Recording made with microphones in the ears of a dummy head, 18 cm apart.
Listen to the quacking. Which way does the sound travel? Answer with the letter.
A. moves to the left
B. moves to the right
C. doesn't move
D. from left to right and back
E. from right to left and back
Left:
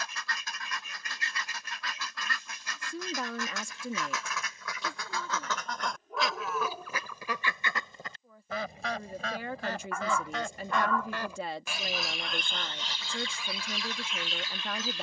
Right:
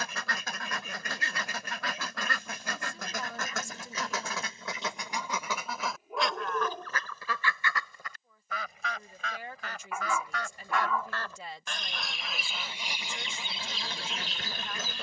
E.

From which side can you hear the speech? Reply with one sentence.
In this clip you hear the speech on the left.